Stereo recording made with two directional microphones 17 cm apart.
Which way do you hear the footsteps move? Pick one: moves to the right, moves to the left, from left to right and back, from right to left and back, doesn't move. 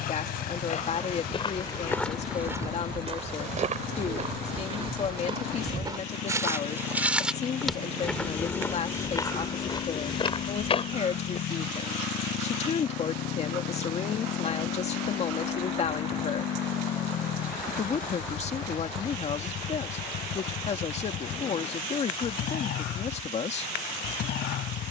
from left to right and back.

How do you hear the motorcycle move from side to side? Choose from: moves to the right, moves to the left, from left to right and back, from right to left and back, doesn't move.
doesn't move.